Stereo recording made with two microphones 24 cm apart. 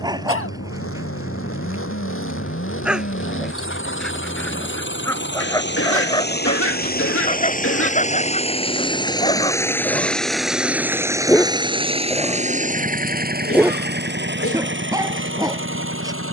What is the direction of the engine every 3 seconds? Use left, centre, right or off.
left, left, left, centre, right, right.